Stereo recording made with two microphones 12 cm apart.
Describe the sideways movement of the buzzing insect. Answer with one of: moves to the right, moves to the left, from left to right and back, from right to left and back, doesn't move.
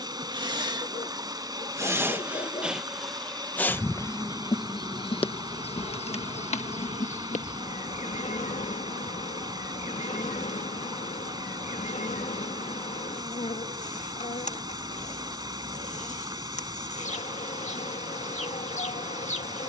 moves to the left.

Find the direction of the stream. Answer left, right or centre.
right.